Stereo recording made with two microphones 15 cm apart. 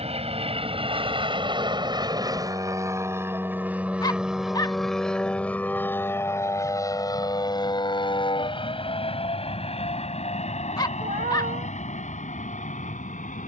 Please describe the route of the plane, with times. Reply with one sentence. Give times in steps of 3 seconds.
You can hear the plane on the right from 0 s, in the centre from 3 s and on the left from 6 s.